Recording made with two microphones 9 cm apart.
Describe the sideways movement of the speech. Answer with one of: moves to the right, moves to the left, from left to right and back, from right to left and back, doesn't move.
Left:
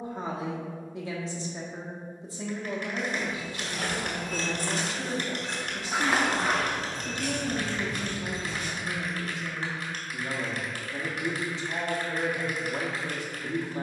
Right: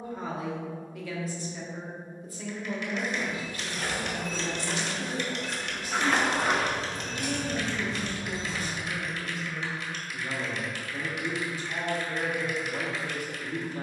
doesn't move.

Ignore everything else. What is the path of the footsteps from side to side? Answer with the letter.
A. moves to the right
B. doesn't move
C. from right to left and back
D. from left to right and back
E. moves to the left
A.